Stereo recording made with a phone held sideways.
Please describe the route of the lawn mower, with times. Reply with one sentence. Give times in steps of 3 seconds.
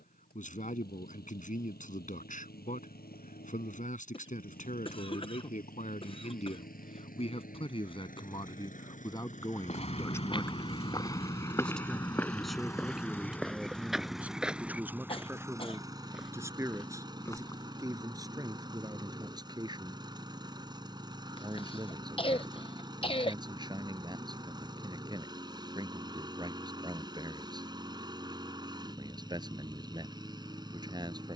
In this clip you hear the lawn mower on the left from 0 s, in the centre from 12 s and on the right from 15 s.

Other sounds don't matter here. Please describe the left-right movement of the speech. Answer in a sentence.
You can hear the speech move from left to right.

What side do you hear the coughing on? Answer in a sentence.
In this clip you hear the coughing on the left.